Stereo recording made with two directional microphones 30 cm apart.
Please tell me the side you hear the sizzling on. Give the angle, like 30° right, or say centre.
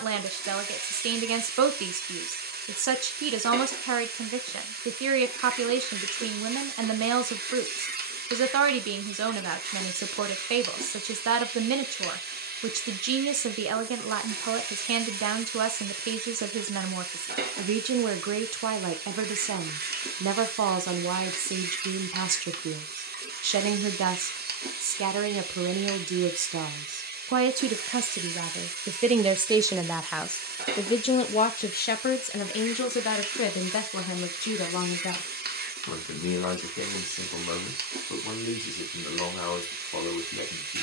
30° right.